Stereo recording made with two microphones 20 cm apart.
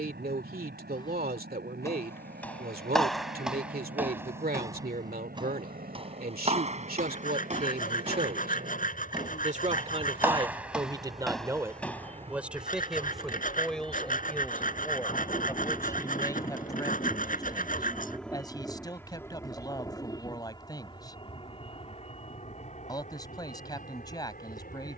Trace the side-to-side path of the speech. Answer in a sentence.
You can hear the speech move to the left.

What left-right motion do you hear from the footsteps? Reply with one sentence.
In this clip you hear the footsteps move from left to right and back again.